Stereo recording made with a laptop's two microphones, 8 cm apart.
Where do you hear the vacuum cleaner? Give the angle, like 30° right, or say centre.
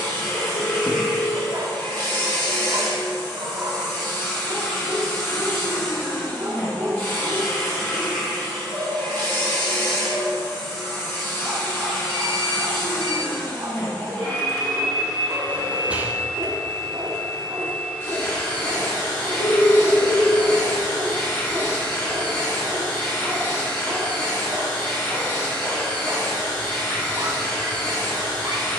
30° left.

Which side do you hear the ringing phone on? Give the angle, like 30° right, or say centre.
80° left.